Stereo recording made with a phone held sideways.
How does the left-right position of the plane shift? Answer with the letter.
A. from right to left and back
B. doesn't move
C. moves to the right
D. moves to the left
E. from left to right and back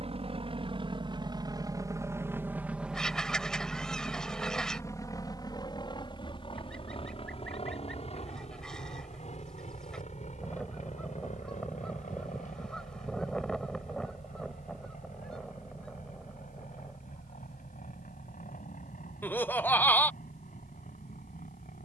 D.